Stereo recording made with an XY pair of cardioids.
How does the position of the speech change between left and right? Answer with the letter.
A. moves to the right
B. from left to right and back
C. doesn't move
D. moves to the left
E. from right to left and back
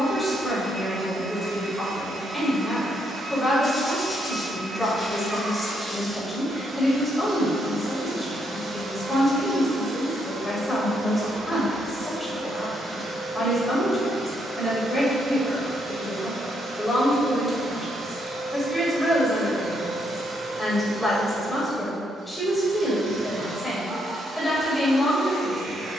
C.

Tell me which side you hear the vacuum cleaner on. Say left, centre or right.
right.